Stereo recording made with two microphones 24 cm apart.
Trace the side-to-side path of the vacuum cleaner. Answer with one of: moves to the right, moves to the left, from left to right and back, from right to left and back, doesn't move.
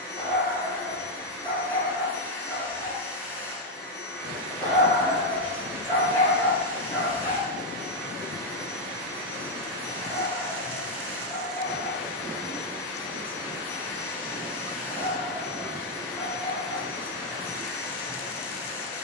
doesn't move.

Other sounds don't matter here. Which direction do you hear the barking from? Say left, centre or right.
left.